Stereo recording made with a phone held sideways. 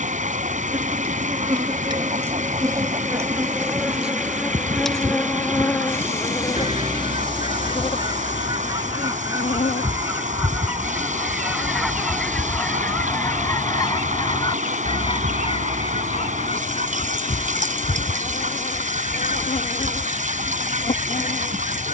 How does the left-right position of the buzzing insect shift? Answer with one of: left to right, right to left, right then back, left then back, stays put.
right to left.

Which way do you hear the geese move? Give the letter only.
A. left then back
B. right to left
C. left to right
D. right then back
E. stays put
B.